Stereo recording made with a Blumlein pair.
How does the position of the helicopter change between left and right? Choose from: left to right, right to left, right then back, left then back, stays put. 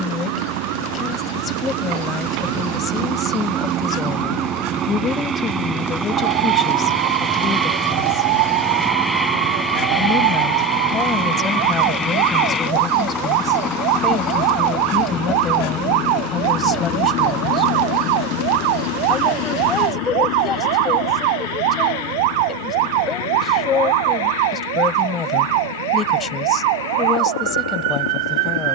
right to left.